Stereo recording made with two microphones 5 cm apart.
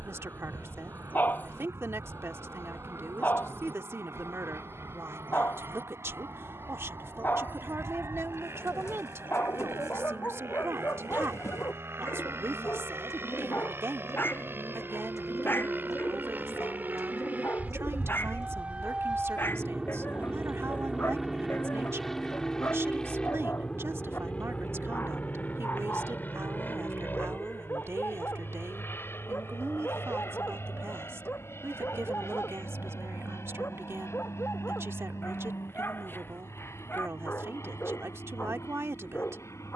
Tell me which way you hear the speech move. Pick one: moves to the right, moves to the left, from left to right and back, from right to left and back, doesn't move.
doesn't move.